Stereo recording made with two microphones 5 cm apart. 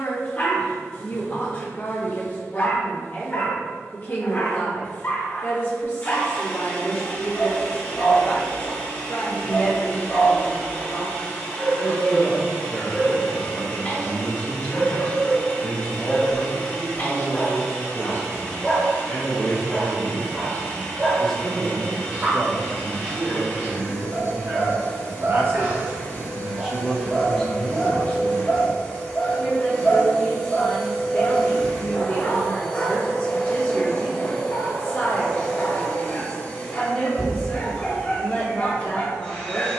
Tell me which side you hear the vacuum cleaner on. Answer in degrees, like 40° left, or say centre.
30° left.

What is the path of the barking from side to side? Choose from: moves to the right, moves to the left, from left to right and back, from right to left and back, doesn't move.
from left to right and back.